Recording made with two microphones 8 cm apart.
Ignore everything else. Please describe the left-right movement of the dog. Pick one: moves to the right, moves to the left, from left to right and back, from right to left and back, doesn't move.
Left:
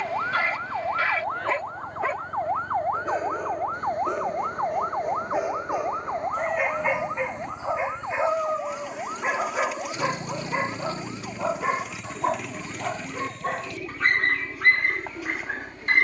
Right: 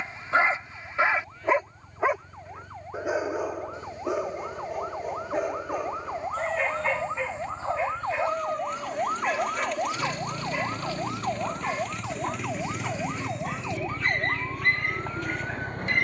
moves to the left.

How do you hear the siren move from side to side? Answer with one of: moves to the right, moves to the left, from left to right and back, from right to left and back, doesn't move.
moves to the right.